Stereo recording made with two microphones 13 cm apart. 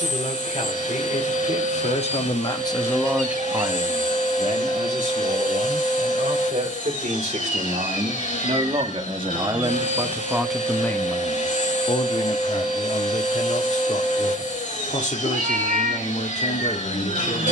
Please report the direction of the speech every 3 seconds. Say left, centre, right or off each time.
left, right, right, centre, left, left.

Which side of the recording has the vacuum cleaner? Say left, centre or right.
left.